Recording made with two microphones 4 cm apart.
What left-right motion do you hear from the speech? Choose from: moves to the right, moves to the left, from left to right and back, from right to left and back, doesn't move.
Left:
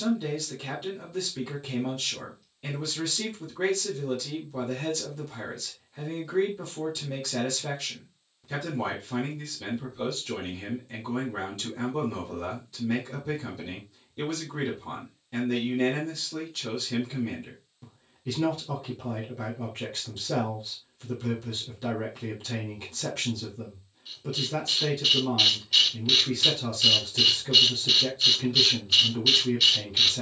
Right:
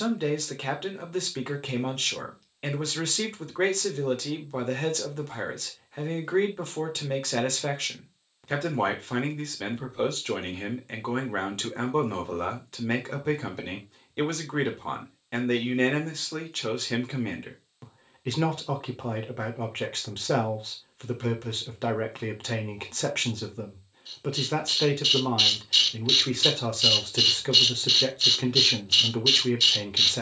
doesn't move.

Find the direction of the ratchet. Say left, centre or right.
centre.